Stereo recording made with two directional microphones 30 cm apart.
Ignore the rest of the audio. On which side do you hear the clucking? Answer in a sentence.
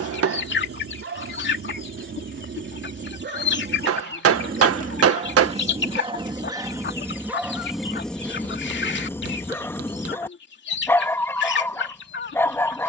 In this clip you hear the clucking on the left.